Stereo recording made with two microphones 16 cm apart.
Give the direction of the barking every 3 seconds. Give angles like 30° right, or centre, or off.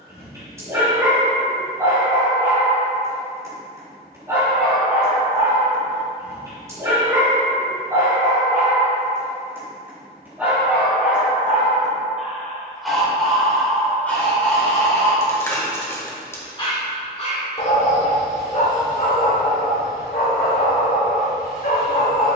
20° right, 20° right, 20° right, 10° right, 10° left, 30° left, 60° left, 70° left.